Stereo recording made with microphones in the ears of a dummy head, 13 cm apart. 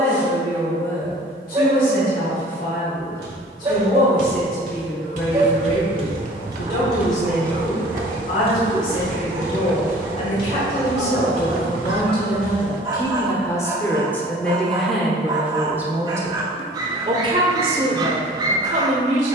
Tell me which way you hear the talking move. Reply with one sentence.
In this clip you hear the talking move to the right.